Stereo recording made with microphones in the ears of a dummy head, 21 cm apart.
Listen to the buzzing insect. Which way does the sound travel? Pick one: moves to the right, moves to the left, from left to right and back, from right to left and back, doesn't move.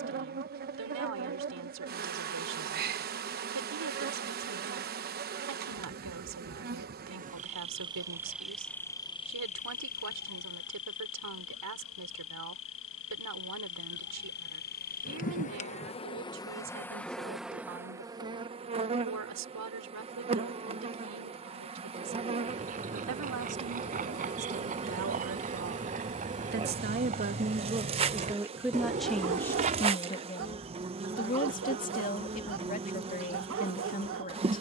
from right to left and back.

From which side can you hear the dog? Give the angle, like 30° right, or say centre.
60° right.